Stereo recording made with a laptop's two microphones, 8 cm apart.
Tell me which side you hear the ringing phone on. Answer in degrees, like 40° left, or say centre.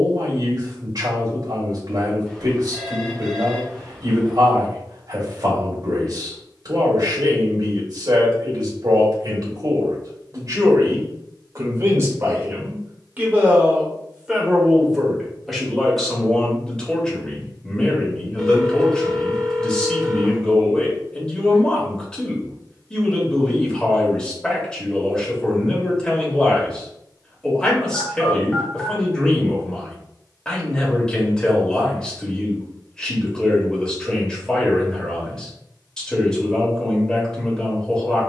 10° left.